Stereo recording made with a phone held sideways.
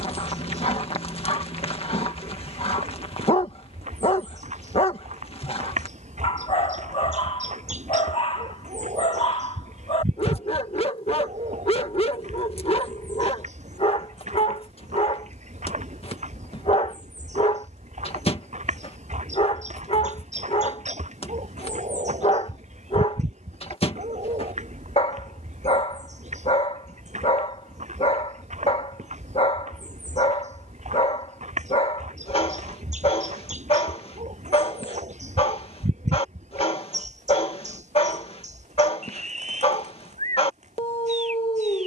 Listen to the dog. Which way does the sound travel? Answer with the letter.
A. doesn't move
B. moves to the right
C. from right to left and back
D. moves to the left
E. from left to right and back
A.